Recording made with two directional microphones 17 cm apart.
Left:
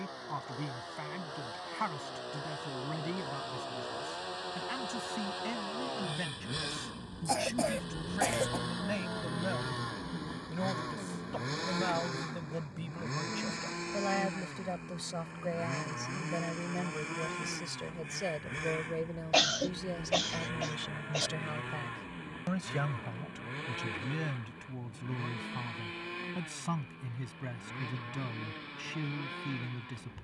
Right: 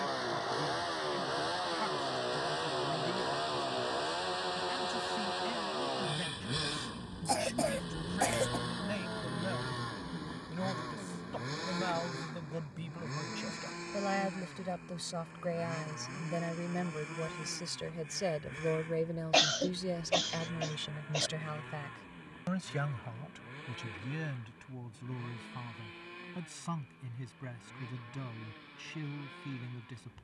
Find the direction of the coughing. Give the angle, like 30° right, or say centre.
centre.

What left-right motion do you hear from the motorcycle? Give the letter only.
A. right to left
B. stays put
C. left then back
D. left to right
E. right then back
A.